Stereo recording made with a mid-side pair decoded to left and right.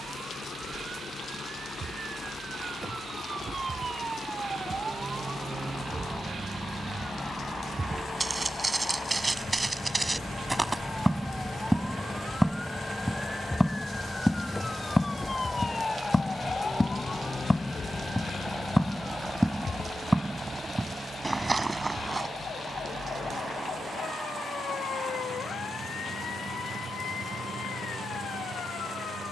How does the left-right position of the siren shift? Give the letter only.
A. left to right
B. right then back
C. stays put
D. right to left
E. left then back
D.